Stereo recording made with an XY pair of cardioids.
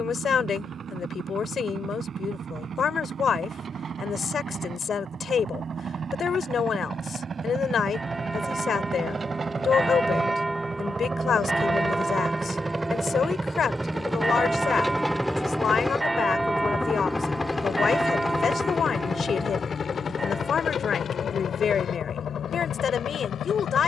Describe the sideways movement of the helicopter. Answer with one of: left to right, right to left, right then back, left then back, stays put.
right to left.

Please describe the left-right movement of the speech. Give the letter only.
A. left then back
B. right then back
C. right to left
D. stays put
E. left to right
D.